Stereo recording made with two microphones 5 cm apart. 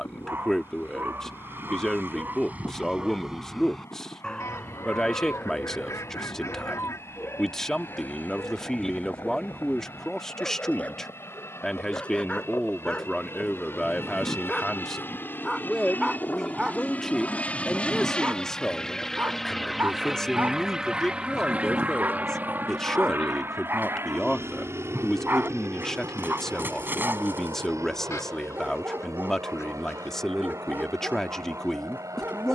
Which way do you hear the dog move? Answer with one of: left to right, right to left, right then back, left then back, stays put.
left then back.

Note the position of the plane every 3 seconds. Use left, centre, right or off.
left, left, left, left, left, left, centre, right, right, right, right.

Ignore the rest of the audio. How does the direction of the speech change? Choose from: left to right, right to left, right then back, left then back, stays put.
stays put.